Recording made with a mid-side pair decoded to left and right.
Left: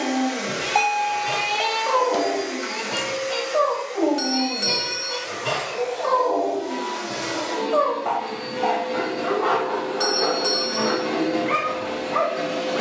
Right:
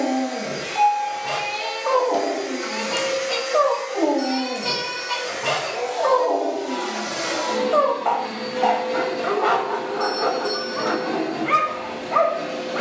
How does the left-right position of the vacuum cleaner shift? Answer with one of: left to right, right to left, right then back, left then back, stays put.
right then back.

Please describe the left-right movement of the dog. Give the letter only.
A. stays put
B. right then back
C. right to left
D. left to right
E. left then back
A.